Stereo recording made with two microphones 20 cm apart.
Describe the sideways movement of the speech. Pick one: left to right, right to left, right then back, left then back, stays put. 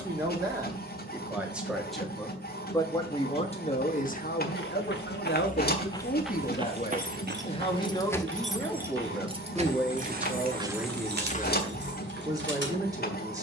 left then back.